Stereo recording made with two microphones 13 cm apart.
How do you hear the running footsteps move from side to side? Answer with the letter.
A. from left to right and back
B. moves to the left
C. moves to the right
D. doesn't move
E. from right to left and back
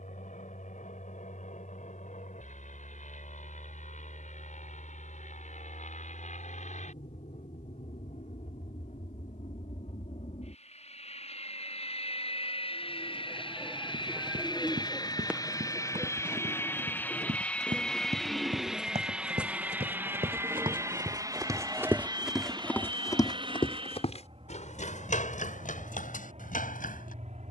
B.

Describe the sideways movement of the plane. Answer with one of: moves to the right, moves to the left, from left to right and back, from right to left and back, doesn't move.
moves to the right.